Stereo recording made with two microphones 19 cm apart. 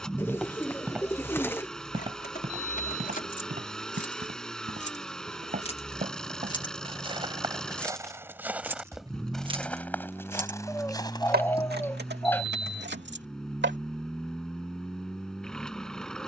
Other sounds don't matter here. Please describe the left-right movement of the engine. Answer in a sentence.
In this clip you hear the engine stay put.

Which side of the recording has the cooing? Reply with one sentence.
In this clip you hear the cooing in the centre.